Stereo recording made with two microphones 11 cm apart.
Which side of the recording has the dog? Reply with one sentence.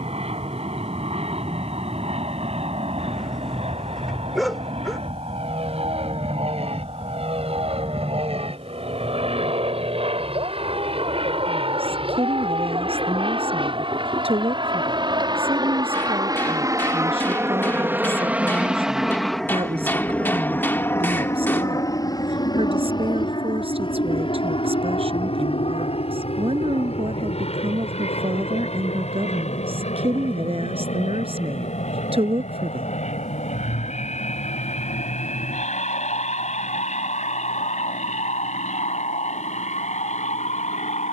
In this clip you hear the dog in the centre.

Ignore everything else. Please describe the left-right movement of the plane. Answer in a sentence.
You can hear the plane travel towards the left.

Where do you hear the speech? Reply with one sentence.
You can hear the speech on the right.